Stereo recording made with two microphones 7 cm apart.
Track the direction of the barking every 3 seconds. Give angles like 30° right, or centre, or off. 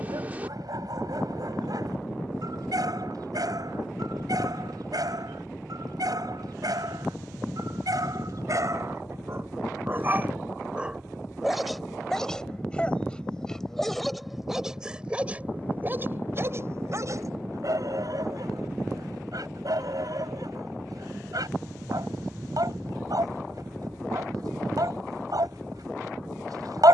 60° right, 60° right, 60° right, 20° right, centre, 40° right, 60° right, 60° right, 60° right.